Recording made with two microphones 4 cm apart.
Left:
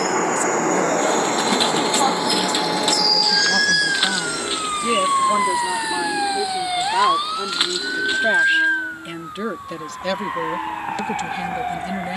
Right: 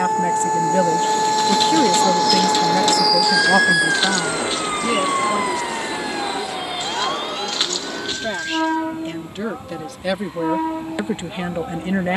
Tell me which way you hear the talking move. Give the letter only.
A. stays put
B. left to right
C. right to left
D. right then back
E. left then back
E.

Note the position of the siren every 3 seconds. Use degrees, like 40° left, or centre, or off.
40° right, centre, 30° left, 40° left.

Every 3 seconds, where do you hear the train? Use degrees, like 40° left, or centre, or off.
30° left, 30° right, 50° right, 60° right.